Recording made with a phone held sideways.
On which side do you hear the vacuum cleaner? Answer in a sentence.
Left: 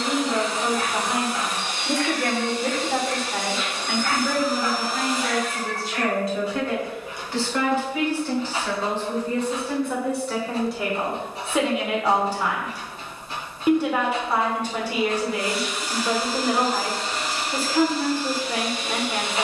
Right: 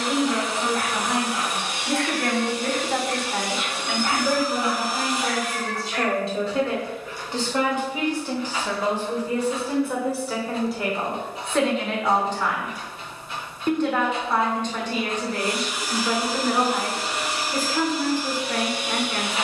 In this clip you hear the vacuum cleaner in the centre.